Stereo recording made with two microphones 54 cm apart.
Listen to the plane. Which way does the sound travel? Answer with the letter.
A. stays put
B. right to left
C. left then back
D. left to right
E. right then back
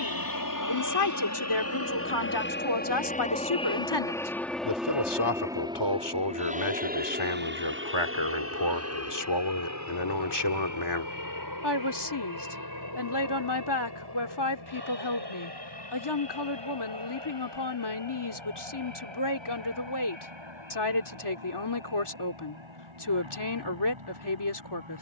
D.